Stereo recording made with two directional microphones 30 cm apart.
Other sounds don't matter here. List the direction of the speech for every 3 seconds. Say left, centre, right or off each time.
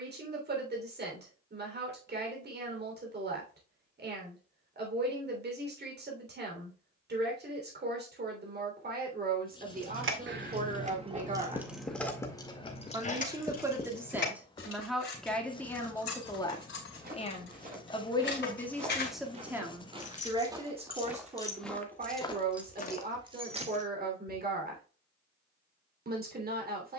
right, right, right, right, centre, centre, centre, right, right.